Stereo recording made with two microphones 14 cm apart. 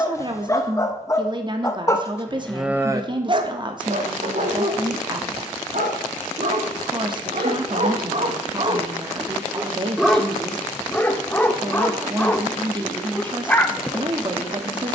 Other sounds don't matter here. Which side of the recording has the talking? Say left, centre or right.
right.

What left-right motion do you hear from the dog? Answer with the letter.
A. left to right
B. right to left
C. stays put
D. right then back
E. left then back
D.